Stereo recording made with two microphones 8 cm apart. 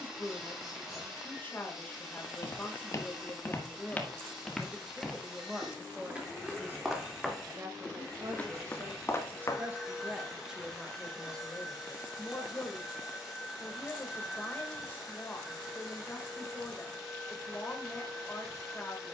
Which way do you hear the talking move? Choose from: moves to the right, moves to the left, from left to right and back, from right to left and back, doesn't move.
from left to right and back.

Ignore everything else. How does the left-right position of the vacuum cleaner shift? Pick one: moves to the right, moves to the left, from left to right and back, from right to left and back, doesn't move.
doesn't move.